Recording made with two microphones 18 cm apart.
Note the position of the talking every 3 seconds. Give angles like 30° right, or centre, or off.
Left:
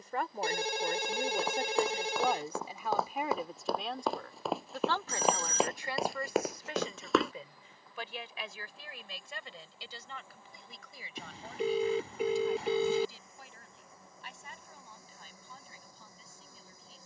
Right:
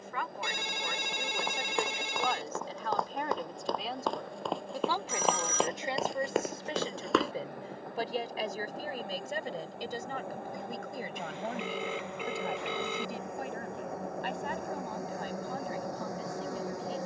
20° left, 10° right, 30° right, 50° right, 60° right, 60° right.